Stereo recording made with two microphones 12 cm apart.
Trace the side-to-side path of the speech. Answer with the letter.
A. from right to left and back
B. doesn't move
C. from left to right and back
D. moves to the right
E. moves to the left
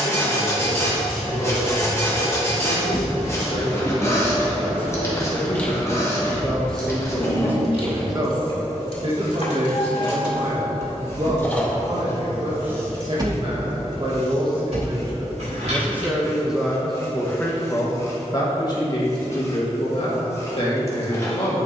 C.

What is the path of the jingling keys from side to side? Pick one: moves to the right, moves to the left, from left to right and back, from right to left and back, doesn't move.
from right to left and back.